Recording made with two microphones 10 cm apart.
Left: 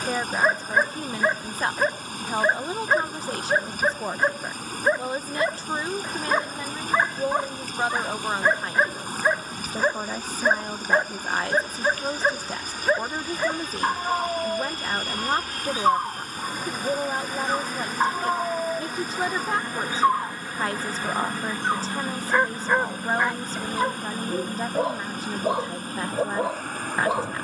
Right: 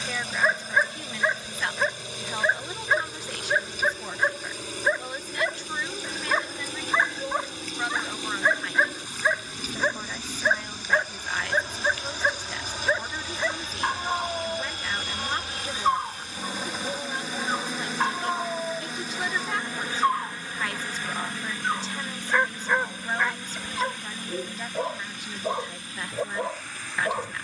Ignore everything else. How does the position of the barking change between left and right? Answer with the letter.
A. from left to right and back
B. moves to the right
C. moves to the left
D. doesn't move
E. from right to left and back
D.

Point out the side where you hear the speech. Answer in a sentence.
In this clip you hear the speech on the left.